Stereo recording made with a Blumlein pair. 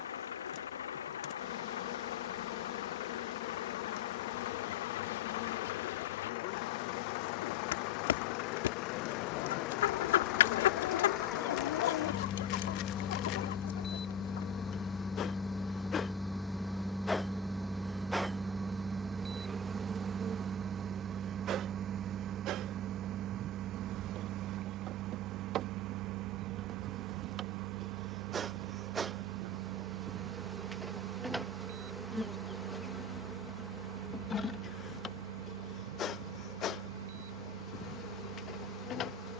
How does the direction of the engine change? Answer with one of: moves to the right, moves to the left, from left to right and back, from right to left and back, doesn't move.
moves to the right.